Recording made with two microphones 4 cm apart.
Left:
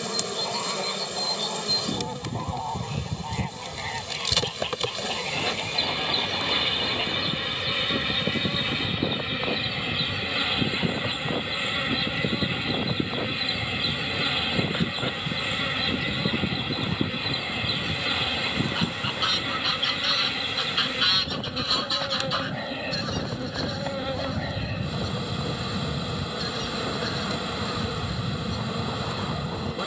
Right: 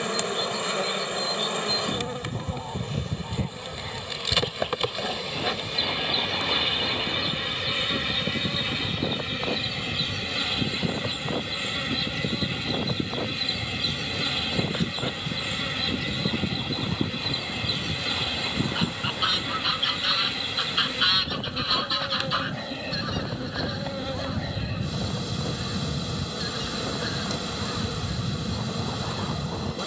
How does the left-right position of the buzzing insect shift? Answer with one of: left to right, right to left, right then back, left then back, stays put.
right to left.